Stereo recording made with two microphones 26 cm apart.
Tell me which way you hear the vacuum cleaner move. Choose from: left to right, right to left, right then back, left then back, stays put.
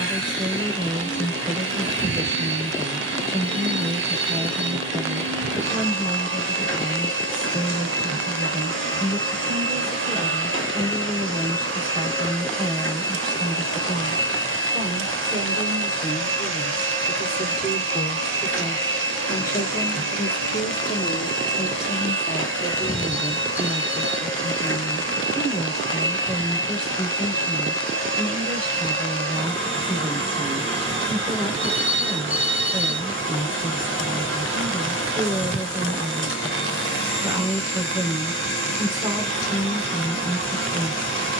stays put.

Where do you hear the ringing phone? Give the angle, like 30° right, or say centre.
20° right.